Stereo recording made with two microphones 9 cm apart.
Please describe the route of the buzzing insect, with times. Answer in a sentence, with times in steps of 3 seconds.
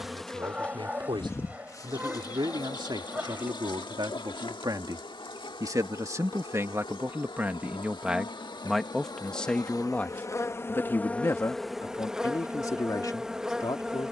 In this clip you hear the buzzing insect on the left from 0 s and in the centre from 12 s.